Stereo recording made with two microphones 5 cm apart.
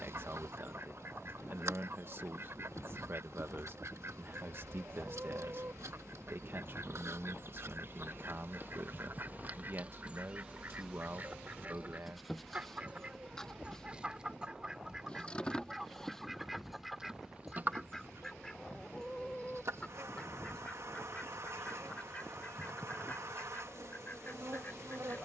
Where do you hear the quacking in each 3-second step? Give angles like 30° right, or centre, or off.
50° right, 50° right, 50° right, 40° right, 20° right, centre, 10° left, 30° left, 40° left.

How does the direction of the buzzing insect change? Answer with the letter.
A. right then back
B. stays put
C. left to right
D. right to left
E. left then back
E.